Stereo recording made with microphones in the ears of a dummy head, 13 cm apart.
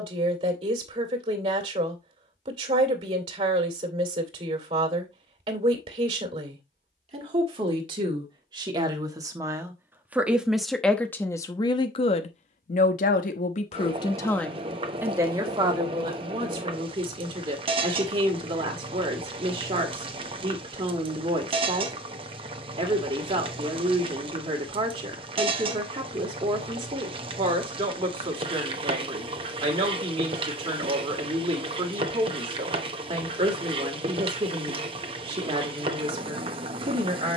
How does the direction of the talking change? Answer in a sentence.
You can hear the talking go left and come back.